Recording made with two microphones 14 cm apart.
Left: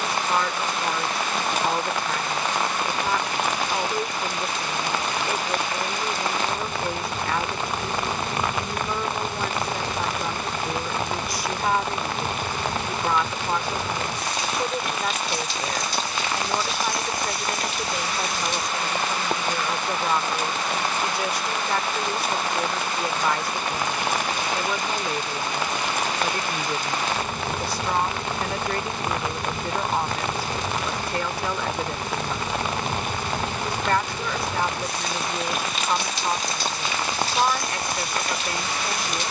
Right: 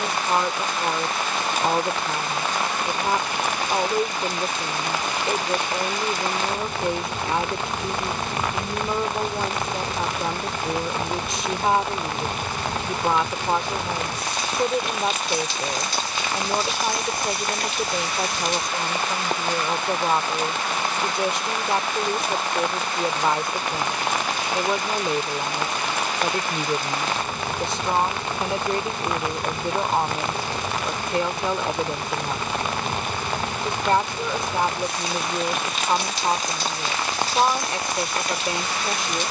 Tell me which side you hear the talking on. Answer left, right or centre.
right.